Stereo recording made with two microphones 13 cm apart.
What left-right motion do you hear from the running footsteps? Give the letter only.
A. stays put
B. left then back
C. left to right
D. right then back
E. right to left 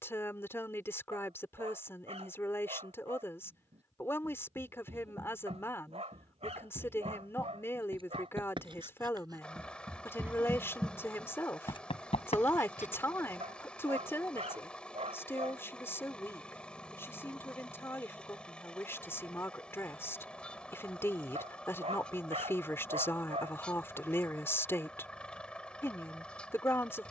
E.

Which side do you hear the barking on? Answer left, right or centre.
right.